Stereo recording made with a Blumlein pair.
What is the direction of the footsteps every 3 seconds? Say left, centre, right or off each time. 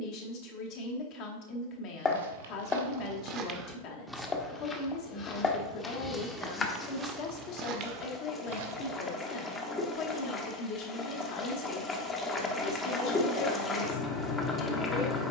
right, centre, right, off, off.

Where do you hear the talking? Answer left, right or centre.
left.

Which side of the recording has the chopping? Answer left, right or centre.
left.